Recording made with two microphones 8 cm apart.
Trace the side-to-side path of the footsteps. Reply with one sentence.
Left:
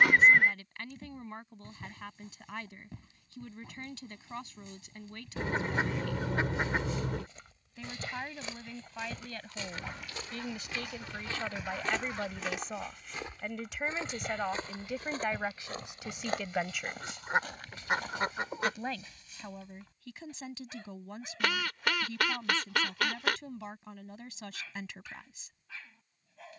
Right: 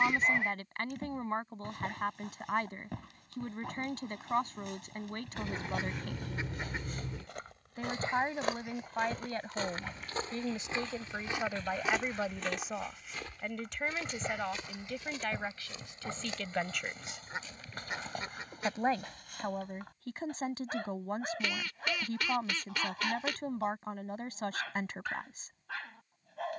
In this clip you hear the footsteps travel towards the left.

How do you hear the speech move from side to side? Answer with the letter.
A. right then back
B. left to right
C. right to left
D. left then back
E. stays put
D.